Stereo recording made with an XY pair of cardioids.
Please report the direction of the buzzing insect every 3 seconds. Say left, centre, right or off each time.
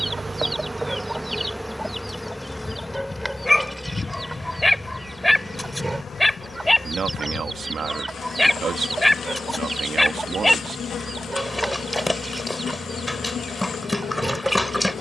centre, left, left, left, left.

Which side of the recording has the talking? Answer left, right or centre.
right.